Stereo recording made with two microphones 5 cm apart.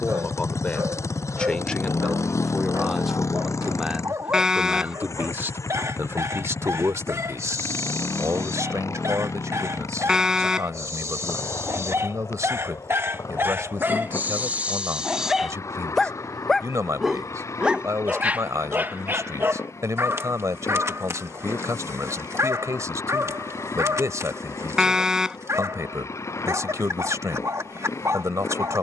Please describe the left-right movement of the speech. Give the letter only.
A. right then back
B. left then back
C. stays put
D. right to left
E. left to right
E.